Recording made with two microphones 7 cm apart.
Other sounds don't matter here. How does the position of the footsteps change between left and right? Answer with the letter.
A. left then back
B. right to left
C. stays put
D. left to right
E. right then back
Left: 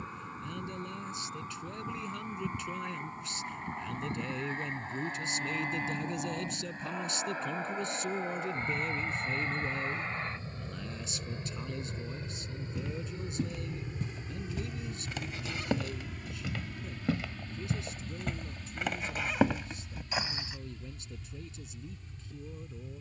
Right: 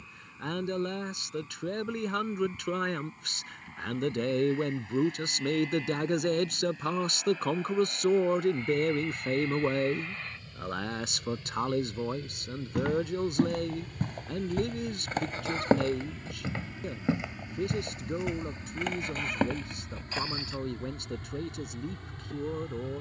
B.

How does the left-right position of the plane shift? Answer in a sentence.
You can hear the plane go from the left side to the right.